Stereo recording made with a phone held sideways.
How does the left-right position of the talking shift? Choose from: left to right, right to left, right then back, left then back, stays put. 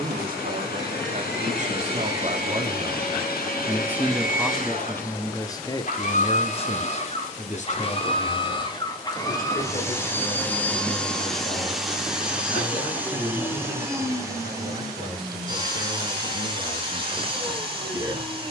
right to left.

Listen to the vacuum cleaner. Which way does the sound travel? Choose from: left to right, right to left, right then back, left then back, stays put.
left to right.